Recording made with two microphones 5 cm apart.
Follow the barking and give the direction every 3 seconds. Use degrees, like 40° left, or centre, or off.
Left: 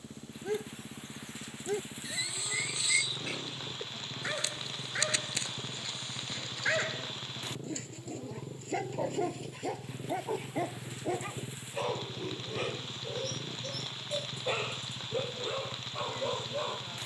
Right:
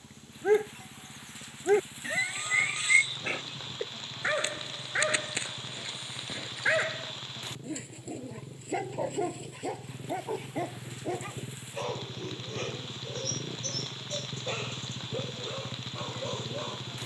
40° right, 30° right, 10° right, centre, 10° left, 10° left.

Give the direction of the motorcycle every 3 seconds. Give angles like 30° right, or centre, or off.
50° left, 40° left, 30° left, 10° left, 20° right, 40° right.